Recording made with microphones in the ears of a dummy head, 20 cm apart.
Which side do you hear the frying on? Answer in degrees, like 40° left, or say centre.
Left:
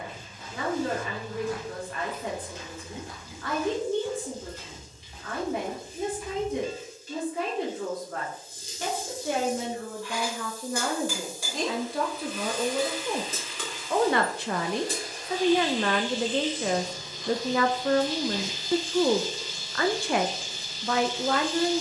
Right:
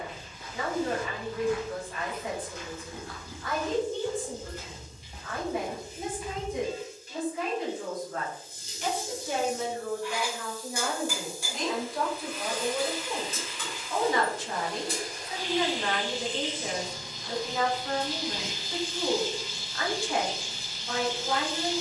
60° left.